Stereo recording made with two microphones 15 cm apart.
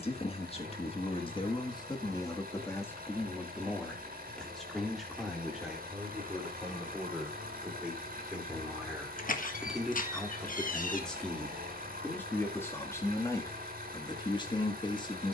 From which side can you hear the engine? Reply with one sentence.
In this clip you hear the engine on the right.